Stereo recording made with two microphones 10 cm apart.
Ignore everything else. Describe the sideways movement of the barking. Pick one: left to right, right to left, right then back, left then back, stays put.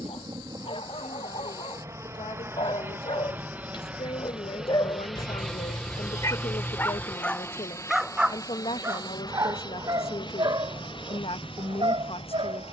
left to right.